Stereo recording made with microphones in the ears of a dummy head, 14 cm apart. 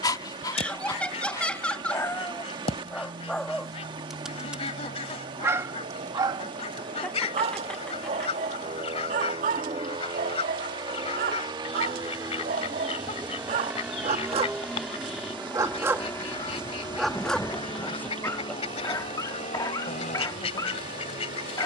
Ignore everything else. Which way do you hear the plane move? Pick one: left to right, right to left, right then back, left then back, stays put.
right to left.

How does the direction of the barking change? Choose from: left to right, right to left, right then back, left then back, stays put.
right then back.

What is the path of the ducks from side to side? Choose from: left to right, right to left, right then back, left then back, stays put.
stays put.